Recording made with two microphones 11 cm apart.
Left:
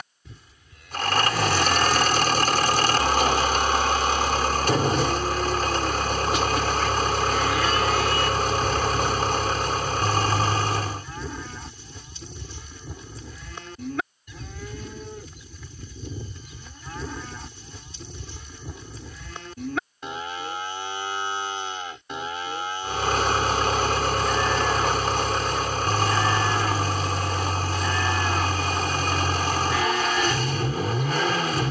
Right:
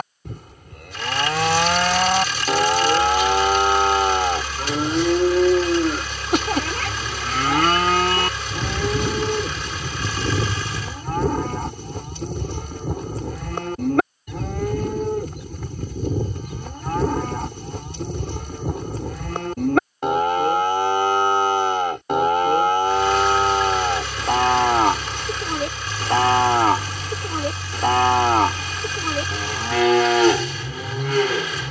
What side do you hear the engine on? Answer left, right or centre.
left.